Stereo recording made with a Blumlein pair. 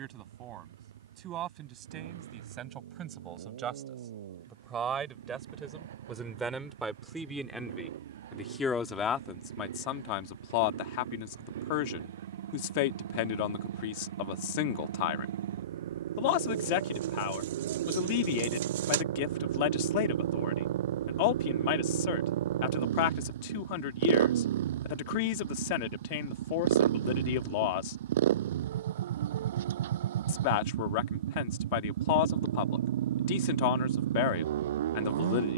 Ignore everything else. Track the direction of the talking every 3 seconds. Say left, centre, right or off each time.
right, right, centre, left, left, left, left, left, left, left, left, left.